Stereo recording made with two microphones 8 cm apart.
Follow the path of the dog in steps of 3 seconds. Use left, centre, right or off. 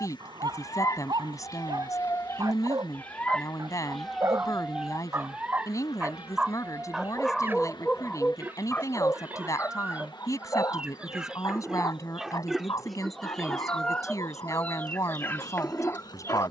right, right, centre, left, left, left.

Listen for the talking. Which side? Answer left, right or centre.
left.